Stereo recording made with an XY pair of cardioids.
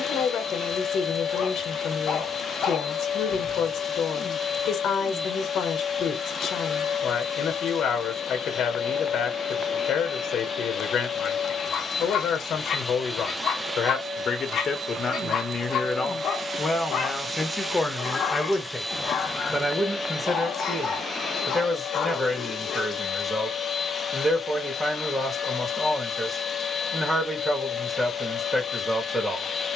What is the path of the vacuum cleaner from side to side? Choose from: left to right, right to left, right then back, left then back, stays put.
right then back.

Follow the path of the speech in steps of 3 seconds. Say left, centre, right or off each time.
left, left, left, left, left, left, centre, centre, centre, centre.